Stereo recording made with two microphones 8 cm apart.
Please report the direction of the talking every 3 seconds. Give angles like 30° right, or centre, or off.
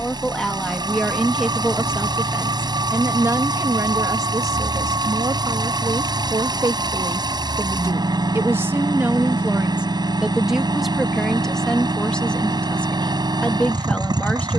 centre, 50° right, 40° right, centre, 20° left.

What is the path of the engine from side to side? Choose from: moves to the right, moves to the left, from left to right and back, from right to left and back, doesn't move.
doesn't move.